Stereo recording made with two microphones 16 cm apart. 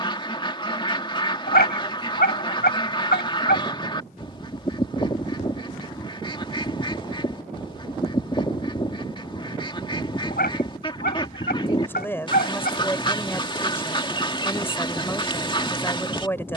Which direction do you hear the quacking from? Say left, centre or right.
left.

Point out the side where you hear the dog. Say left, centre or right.
left.